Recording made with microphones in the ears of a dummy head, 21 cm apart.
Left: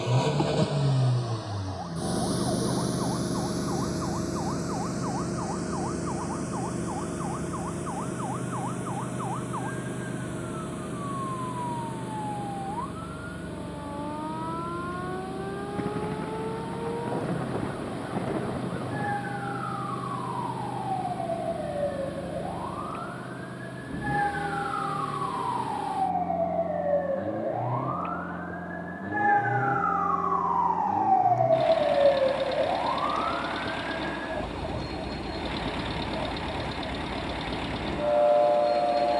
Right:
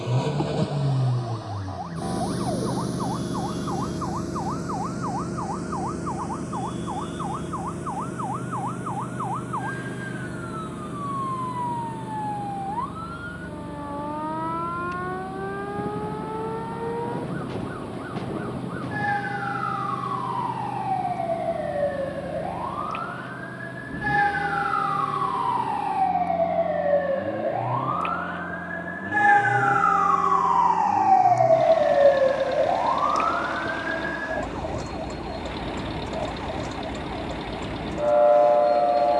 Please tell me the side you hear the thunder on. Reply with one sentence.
You can hear the thunder on the left.